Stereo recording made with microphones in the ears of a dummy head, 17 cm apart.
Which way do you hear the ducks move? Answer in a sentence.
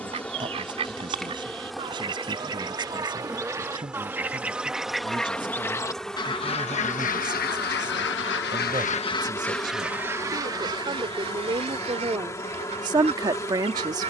You can hear the ducks go left and come back.